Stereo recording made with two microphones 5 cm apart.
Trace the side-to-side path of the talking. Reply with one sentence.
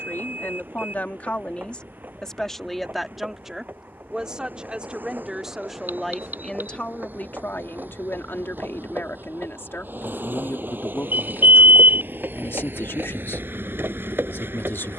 You can hear the talking move from left to right and back again.